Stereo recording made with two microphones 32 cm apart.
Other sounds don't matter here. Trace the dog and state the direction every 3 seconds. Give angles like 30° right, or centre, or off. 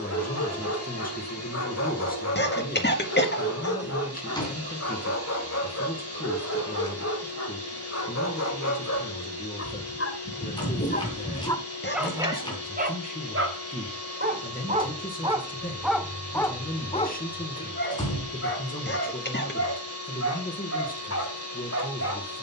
50° left, 50° left, 50° left, 30° left, 20° right, 10° left, 50° left, 50° left.